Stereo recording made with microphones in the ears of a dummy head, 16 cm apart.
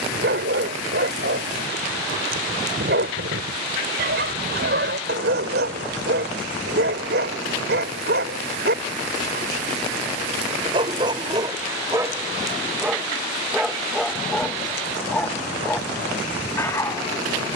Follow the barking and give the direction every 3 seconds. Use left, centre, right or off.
right, right, right, right, centre, centre.